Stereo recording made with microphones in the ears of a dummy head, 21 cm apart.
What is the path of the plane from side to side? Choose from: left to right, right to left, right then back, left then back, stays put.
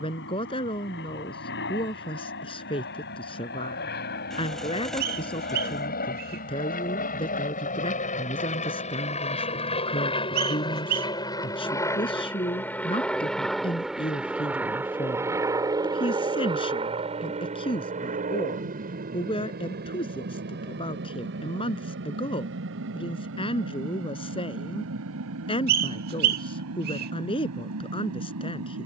left to right.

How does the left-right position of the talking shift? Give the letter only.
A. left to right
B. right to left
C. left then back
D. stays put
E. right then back
D.